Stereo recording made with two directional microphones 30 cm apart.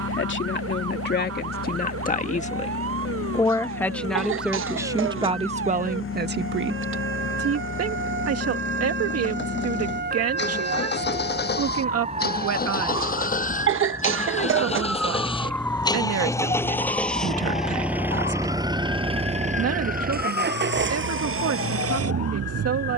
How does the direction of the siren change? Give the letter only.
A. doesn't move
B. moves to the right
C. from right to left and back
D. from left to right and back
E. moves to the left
E.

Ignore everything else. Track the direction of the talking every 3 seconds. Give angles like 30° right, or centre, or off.
30° left, 10° right, 50° right, 60° right, 60° right, 60° right, 60° right, 60° right.